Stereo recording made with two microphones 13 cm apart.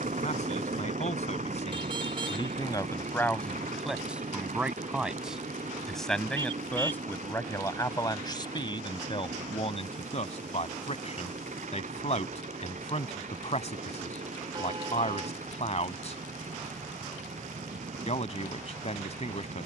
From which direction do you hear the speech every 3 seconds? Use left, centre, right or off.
left, centre, left, left, left, left, left.